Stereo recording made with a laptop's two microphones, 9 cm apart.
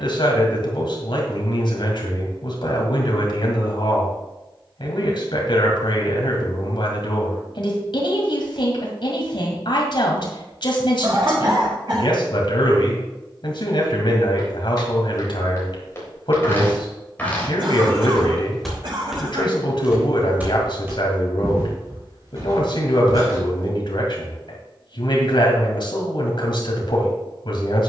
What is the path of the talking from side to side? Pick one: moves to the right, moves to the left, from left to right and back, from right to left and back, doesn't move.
doesn't move.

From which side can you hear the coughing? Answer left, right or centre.
right.